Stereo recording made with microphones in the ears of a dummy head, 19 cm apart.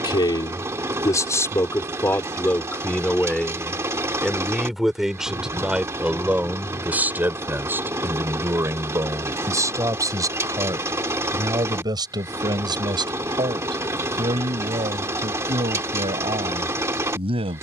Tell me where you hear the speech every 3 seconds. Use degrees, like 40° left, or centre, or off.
10° left, centre, 10° right, 20° right, 20° right, 20° right.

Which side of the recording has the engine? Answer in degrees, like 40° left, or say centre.
10° right.